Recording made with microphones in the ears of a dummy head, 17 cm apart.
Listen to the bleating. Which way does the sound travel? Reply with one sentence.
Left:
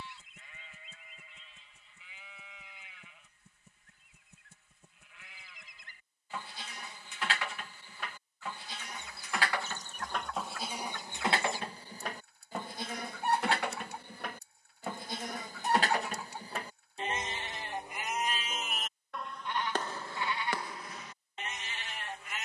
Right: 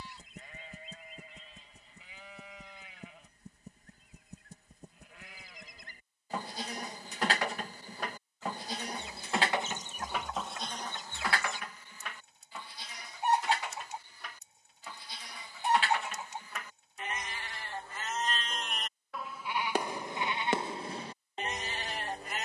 You can hear the bleating move from right to left and back again.